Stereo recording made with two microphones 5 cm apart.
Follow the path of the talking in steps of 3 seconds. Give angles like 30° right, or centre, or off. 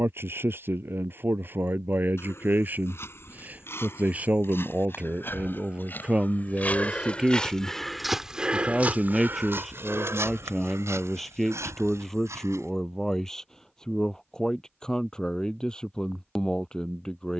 50° right, 30° right, 20° right, centre, 10° left, 10° left.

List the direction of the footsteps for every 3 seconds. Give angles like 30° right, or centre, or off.
60° left, 60° left, 10° left, 60° right, 80° right, off.